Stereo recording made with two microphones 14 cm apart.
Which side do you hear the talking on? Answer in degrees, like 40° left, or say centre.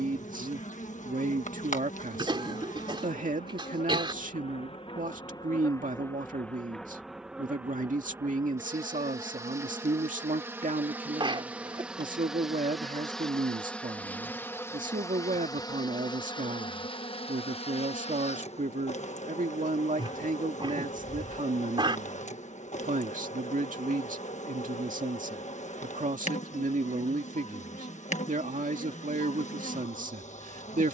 70° right.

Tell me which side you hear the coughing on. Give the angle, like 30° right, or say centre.
40° right.